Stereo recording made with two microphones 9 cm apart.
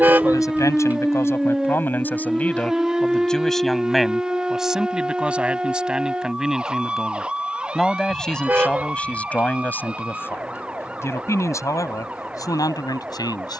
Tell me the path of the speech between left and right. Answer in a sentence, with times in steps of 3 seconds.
You can hear the speech on the left from 0 s, in the centre from 3 s and on the left from 9 s.